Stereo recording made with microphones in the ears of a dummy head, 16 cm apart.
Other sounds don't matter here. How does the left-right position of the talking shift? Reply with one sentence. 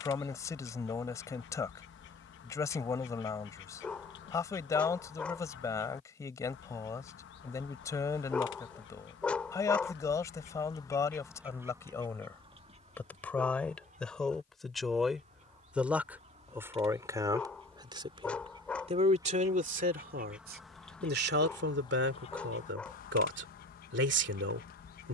In this clip you hear the talking move from left to right.